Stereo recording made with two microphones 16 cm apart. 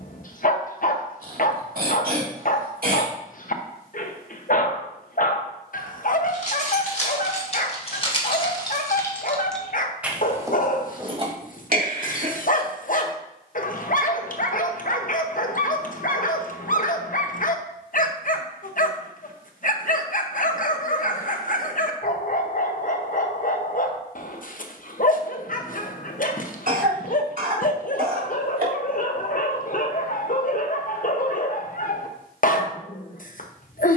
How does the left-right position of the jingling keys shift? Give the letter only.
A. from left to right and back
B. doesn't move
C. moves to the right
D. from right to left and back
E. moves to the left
C.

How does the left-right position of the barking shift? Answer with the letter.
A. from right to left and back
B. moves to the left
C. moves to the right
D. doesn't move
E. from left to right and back
D.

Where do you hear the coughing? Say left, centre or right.
right.